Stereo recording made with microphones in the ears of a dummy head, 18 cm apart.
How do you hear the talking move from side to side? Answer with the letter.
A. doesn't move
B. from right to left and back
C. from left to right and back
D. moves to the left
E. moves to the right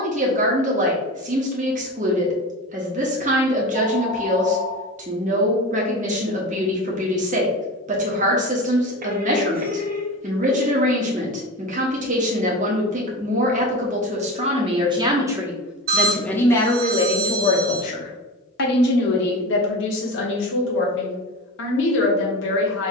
D.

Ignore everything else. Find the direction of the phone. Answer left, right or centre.
right.